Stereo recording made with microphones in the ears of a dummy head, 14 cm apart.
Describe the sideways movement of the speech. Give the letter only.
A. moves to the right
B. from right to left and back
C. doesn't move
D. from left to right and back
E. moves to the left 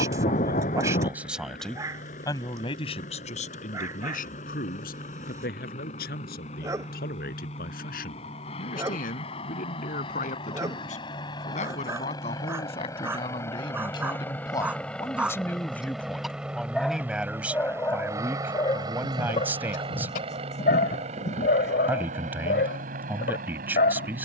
B.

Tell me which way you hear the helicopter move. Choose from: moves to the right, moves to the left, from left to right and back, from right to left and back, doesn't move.
moves to the right.